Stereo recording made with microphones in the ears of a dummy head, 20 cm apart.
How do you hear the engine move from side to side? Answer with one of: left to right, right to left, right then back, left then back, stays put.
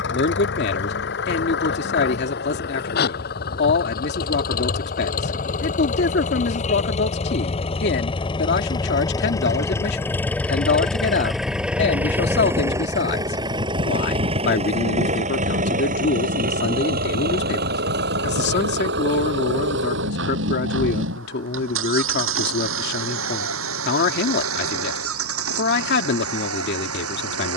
left to right.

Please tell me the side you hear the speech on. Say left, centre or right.
left.